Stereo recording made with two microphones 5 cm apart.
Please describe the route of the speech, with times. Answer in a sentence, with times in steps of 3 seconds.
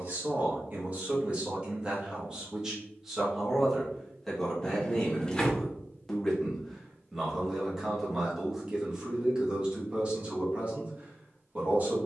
You can hear the speech on the right from 0 s, in the centre from 3 s and on the right from 9 s.